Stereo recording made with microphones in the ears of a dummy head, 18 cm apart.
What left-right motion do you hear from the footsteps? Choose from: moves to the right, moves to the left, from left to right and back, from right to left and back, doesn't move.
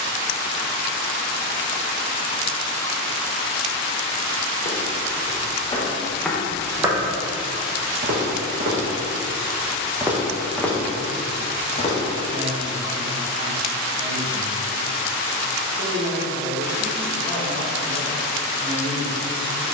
from left to right and back.